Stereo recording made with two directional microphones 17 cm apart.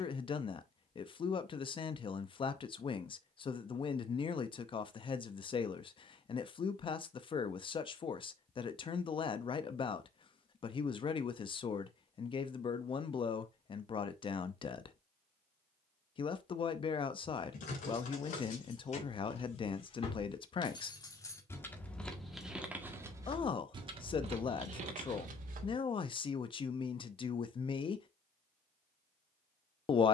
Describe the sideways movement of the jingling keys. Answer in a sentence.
In this clip you hear the jingling keys move from left to right.